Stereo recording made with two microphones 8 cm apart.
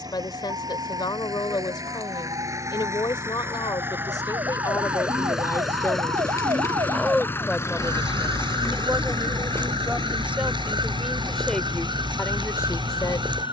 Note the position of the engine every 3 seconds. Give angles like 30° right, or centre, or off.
50° right, 20° right, 30° left, 60° left, 70° left.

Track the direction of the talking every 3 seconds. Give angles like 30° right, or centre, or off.
60° left, 50° left, centre, 10° right, 40° left.